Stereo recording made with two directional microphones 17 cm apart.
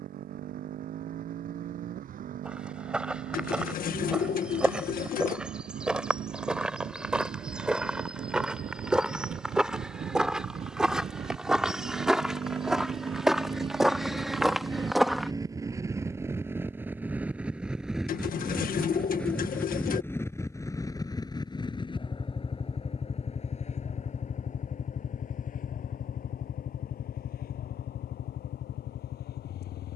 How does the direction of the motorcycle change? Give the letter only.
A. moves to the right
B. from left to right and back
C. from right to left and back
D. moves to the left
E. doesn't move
D.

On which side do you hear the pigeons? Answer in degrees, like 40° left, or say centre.
60° left.